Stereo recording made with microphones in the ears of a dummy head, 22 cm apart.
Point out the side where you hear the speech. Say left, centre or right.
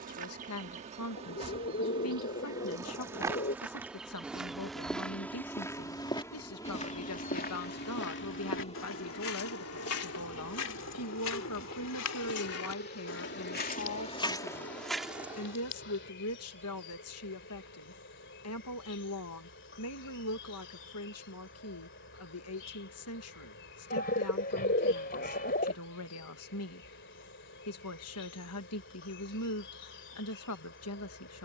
left.